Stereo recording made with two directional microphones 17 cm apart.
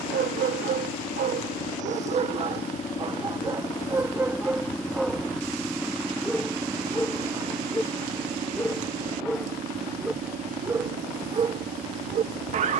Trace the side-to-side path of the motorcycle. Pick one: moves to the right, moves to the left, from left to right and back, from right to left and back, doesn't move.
moves to the right.